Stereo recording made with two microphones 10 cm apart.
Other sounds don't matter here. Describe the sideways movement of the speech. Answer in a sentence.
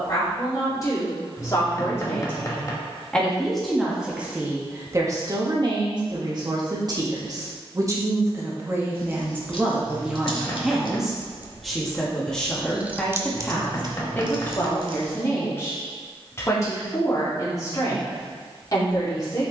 You can hear the speech go right and come back.